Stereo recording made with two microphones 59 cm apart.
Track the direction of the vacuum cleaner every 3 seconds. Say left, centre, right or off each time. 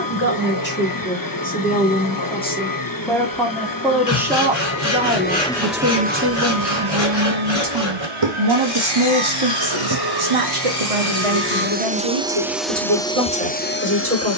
left, left, right, right, centre.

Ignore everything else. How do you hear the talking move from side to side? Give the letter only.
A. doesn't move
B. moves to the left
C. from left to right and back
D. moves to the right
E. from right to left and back
D.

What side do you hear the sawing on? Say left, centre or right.
left.